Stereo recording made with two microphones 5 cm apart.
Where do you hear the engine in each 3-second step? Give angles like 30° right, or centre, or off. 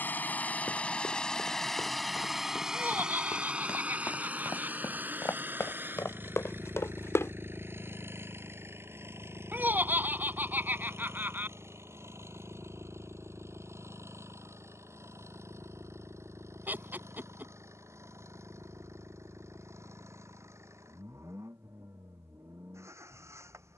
10° left, 30° right, 50° right, 60° right, 60° right, 60° right, 70° right, 70° right.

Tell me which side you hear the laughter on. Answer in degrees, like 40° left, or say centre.
40° right.